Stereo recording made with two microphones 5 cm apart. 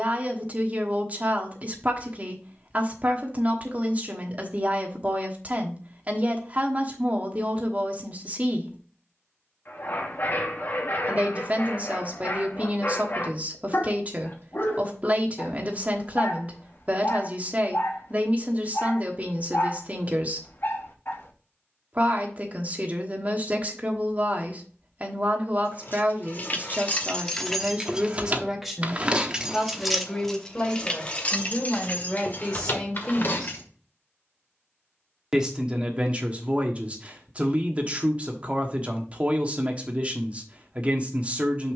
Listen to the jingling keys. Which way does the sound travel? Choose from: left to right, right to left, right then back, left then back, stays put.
right then back.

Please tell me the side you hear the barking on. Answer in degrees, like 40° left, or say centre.
50° left.